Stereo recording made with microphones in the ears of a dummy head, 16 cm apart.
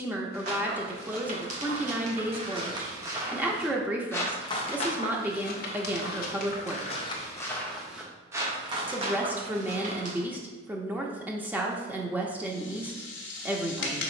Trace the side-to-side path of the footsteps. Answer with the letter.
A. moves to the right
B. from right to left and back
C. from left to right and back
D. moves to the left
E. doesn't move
B.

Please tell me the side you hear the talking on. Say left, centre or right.
centre.